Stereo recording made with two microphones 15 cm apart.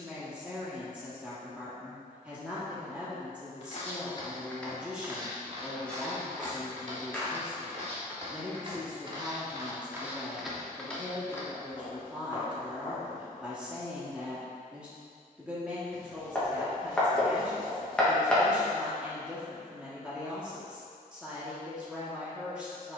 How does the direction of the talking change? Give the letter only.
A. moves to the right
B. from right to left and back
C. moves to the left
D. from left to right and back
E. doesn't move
E.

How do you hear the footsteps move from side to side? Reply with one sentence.
You can hear the footsteps go right and come back.